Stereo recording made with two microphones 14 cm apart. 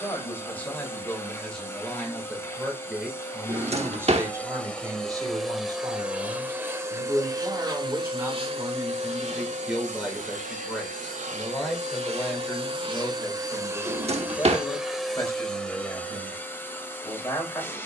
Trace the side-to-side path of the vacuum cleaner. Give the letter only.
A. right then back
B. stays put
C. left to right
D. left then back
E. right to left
A.